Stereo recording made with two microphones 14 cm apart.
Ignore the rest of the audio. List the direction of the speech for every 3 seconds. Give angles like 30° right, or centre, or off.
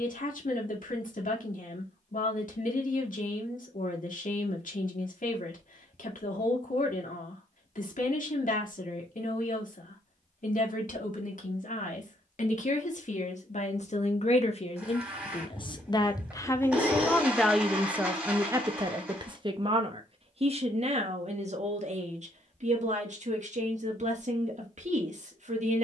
70° left, 70° left, 70° left, 70° left, 60° left, 20° left, 30° right, 60° right, 60° right.